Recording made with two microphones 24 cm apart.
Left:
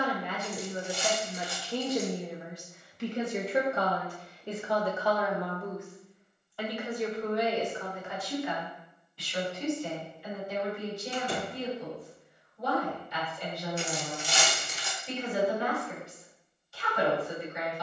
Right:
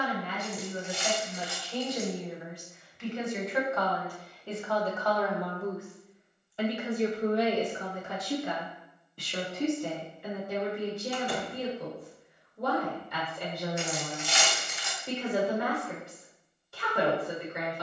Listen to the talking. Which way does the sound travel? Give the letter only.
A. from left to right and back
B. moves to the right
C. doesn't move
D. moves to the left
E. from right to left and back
B.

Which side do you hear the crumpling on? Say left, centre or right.
left.